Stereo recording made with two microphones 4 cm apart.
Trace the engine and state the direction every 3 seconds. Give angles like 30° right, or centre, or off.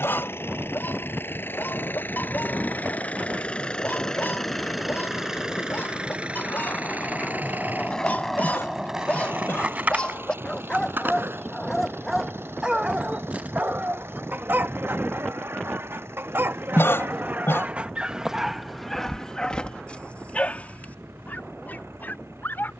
50° left, centre, 40° right, 60° right, 70° right, 70° right, 70° right, 80° right.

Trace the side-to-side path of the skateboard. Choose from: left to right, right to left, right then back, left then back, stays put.
left to right.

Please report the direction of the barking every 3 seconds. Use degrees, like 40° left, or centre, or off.
50° left, 50° left, 40° left, 20° left, 40° right, 50° right, 10° left, 50° left.